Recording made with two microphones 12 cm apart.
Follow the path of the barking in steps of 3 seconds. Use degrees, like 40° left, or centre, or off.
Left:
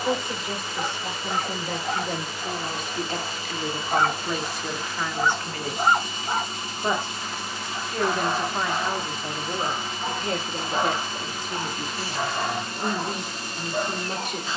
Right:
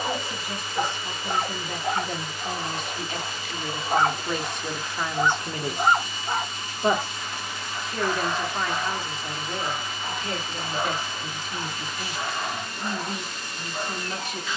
40° right, 10° right, 20° left, 40° left, 60° left.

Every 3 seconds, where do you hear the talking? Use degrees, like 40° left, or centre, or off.
50° left, 10° left, centre, 40° left, 50° left.